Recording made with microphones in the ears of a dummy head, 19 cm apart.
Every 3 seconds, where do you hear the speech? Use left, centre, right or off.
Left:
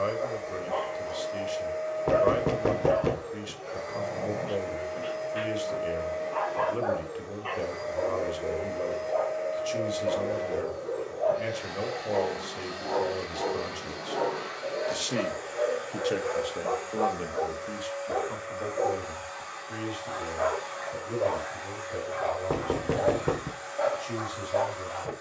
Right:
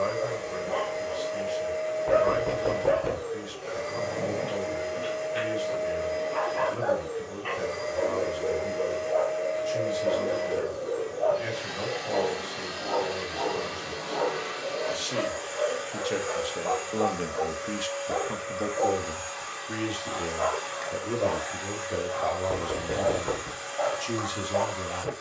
left, left, left, left, left, centre, right, right, right.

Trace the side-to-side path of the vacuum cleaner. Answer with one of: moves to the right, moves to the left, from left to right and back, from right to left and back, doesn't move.
doesn't move.